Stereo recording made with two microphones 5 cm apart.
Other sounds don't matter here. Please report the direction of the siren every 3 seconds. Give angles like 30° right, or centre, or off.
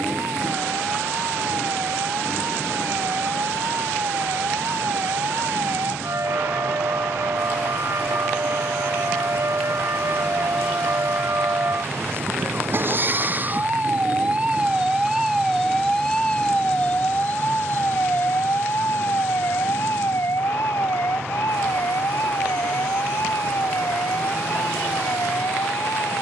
80° right, 80° right, 70° right, 60° right, 40° right, 10° left, 50° left, 70° left, 70° left.